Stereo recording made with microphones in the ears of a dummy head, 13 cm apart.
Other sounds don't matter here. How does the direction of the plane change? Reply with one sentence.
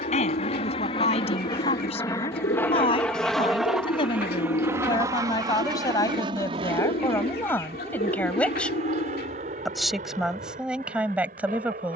In this clip you hear the plane move to the right.